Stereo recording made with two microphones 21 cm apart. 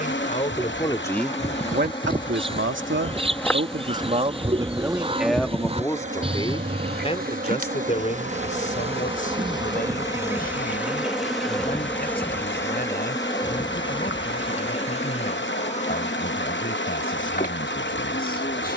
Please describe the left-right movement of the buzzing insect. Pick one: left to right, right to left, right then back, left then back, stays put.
right then back.